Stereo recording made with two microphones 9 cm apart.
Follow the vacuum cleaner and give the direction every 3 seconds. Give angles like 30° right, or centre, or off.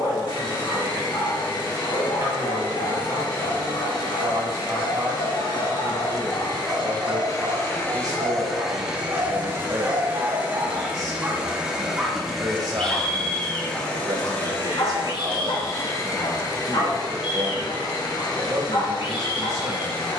60° left, 60° left, 30° left, 20° right, 10° left, 40° left, 60° left.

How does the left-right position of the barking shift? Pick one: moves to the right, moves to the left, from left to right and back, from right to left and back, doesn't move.
from left to right and back.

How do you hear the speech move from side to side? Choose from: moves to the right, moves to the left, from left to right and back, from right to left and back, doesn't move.
doesn't move.